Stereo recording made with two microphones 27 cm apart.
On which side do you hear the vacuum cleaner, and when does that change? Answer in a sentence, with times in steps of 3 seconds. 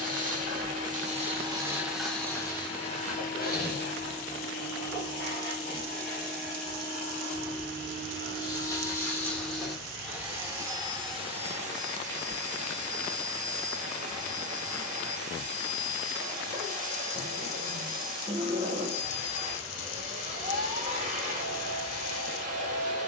You can hear the vacuum cleaner in the centre from 0 s, on the left from 3 s, in the centre from 9 s and on the right from 12 s.